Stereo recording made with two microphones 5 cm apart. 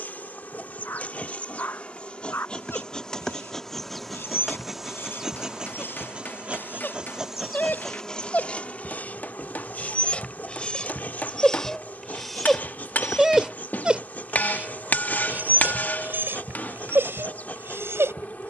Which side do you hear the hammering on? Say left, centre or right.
left.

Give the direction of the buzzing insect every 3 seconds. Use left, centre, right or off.
left, centre, centre, left, left, left.